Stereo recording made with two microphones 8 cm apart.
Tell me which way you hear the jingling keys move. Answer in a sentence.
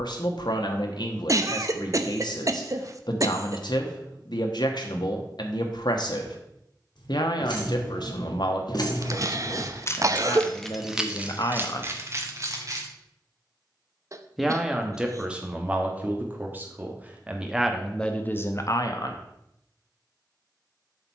You can hear the jingling keys move to the right.